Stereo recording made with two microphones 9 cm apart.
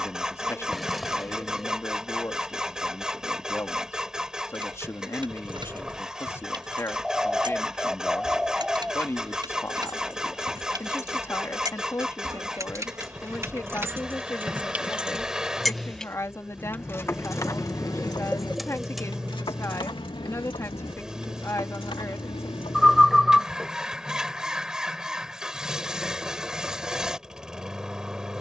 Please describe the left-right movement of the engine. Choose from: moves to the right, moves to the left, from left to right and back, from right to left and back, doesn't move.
doesn't move.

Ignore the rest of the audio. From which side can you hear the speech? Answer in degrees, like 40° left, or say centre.
30° left.